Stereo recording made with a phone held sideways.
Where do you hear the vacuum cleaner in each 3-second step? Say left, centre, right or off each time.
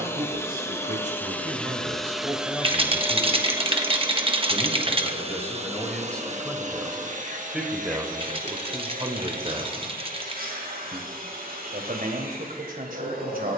centre, right, right, right, right.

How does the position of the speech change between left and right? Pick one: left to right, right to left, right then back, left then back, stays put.
left then back.